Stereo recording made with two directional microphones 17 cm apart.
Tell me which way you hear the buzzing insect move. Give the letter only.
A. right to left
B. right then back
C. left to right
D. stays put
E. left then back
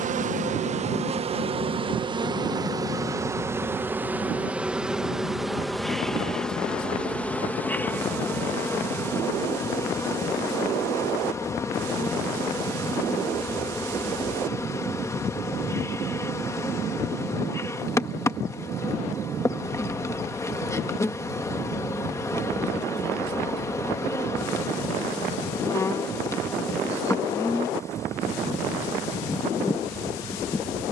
A.